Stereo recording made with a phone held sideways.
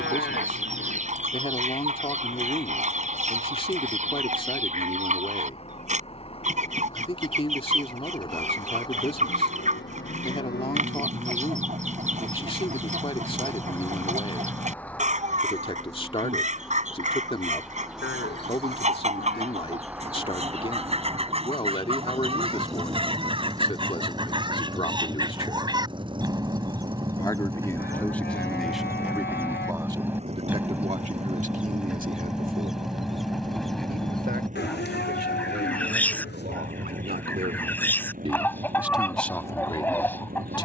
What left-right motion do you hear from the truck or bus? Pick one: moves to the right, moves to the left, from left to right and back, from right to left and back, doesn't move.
moves to the right.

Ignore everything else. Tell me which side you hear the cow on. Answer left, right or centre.
left.